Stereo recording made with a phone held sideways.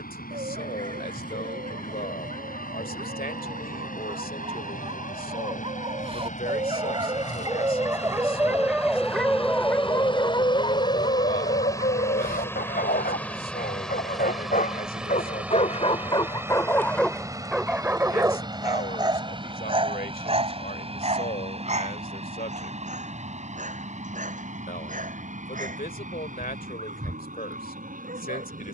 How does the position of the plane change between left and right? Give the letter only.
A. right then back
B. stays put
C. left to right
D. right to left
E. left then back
C.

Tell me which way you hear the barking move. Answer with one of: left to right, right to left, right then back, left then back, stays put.
left then back.